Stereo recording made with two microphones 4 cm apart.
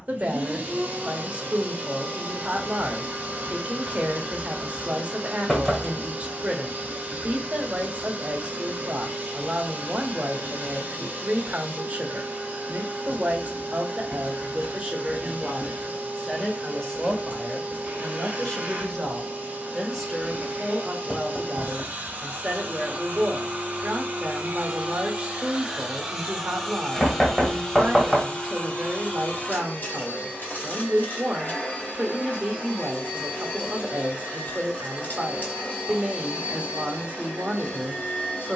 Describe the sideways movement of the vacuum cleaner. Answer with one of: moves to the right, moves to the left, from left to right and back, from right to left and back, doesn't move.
moves to the left.